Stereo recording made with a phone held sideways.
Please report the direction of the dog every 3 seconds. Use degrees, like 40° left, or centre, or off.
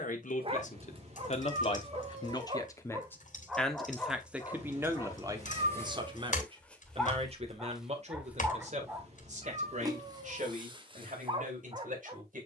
30° right, 10° left, centre, 30° right.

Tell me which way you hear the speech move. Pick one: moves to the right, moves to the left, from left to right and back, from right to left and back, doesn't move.
moves to the right.